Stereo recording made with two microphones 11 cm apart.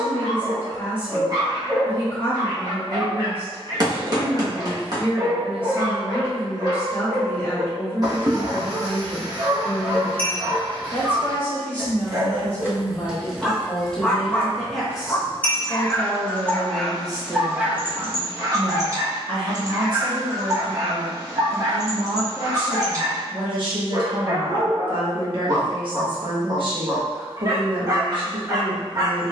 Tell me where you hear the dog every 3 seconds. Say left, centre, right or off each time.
right, right, right, right, centre, centre, right, right, right, right.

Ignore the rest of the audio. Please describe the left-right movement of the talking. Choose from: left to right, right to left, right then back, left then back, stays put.
left to right.